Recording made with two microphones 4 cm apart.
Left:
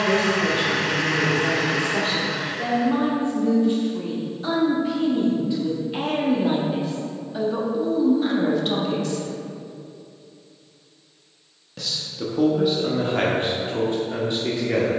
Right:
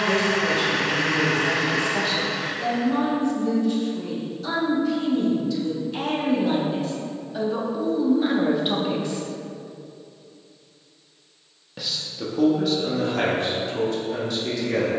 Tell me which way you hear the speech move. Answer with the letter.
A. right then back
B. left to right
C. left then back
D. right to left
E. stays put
A.